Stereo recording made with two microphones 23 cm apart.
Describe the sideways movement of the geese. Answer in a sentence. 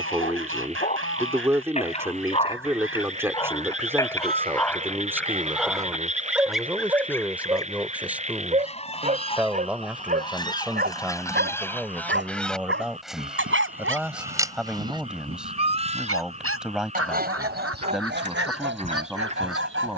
You can hear the geese go left and come back.